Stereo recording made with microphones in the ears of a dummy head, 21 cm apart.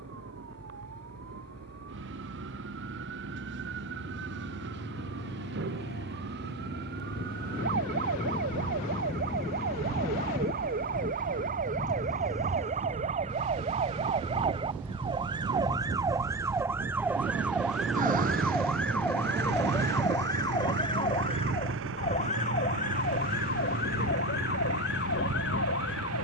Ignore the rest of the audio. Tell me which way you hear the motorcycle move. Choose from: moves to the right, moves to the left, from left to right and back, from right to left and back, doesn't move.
moves to the right.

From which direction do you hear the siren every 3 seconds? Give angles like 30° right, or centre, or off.
60° right, 50° right, 50° right, 40° right, 30° right, 10° right, 10° left, 30° left, 50° left.